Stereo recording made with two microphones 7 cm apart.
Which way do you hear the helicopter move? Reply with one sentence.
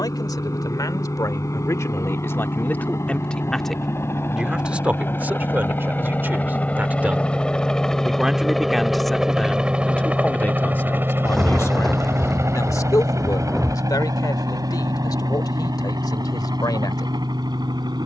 You can hear the helicopter move from left to right.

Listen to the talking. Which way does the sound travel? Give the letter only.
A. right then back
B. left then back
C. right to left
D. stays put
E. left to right
A.